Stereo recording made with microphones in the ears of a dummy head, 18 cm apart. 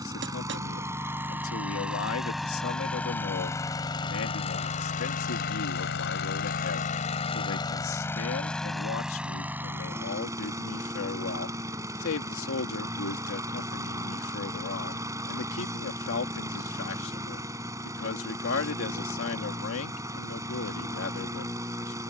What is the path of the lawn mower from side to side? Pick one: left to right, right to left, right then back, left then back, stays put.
left then back.